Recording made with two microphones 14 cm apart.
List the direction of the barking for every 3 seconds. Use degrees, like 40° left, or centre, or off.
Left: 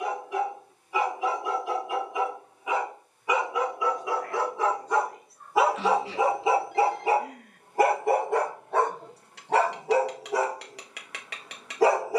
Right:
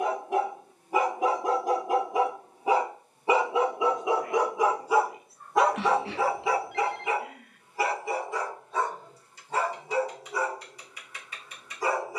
40° right, 10° right, 40° left, 70° left.